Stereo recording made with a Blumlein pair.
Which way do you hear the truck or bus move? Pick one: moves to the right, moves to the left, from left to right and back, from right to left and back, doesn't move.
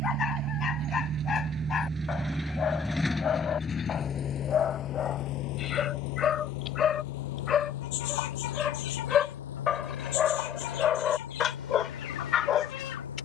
moves to the left.